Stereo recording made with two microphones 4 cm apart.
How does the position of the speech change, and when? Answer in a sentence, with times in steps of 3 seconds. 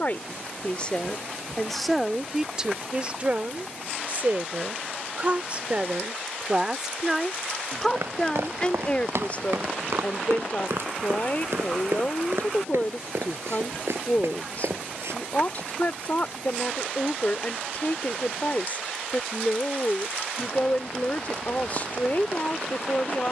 You can hear the speech in the centre from 0 s, on the right from 3 s, in the centre from 6 s and on the left from 9 s.